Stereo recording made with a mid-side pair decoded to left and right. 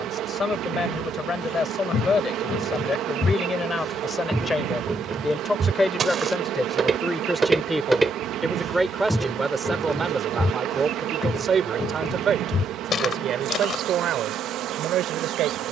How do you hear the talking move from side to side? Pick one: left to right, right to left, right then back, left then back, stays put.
left to right.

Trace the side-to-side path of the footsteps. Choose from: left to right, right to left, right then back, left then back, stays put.
right then back.